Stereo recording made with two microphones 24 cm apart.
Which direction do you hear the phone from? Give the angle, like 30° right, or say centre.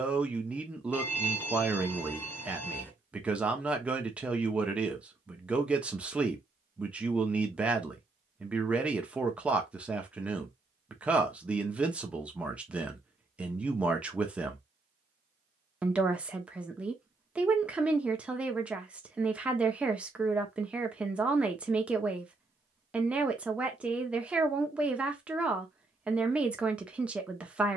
10° left.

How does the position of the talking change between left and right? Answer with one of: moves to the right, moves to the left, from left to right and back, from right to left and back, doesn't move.
doesn't move.